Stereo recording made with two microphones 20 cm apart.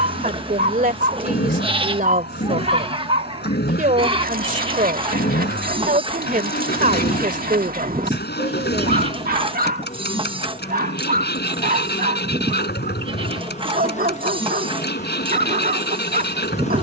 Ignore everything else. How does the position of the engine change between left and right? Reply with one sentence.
In this clip you hear the engine stay put.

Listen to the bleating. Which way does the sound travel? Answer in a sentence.
You can hear the bleating stay in one place.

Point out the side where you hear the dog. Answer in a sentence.
In this clip you hear the dog on the right.